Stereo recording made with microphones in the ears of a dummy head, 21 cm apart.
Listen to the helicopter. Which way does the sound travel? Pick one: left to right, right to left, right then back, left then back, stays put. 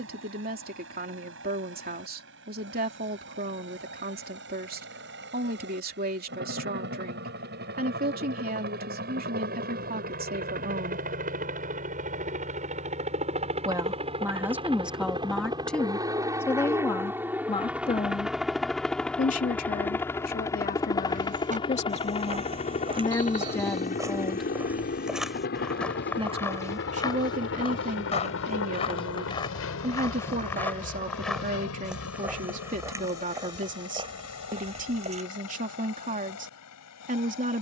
right to left.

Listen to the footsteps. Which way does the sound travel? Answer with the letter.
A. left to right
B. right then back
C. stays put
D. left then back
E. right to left
D.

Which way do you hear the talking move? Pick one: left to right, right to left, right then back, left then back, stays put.
left then back.